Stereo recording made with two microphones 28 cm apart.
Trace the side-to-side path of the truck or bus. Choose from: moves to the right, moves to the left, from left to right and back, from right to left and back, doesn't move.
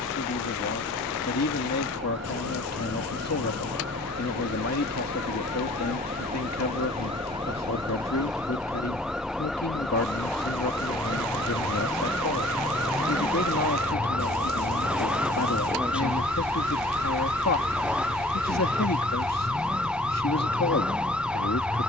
moves to the left.